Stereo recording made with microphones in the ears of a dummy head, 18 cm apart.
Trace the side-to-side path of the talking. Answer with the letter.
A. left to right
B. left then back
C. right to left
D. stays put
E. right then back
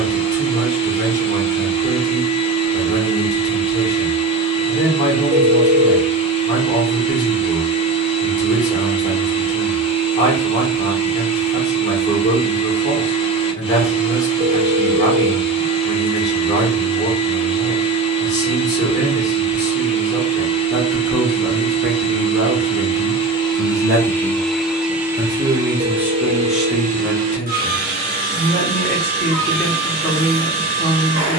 E.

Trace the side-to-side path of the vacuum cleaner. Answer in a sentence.
You can hear the vacuum cleaner move from left to right.